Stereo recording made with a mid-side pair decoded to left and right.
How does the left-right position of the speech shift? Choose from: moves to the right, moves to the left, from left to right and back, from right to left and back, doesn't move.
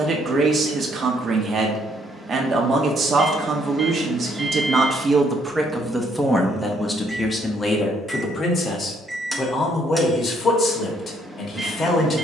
moves to the left.